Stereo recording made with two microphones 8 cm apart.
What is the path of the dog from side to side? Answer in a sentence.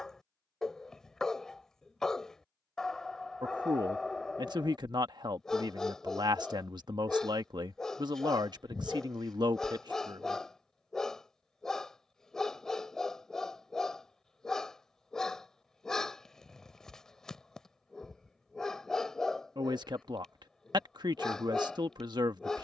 You can hear the dog stay in one place.